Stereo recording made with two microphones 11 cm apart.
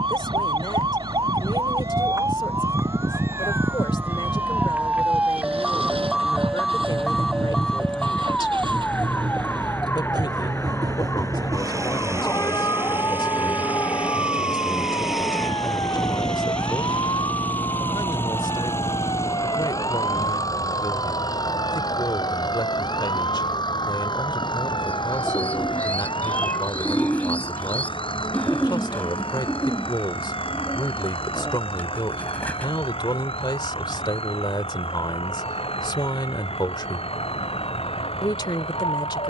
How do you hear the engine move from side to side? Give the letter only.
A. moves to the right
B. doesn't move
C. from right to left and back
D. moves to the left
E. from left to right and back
D.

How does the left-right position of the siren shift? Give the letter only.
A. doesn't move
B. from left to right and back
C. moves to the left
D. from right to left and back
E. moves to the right
C.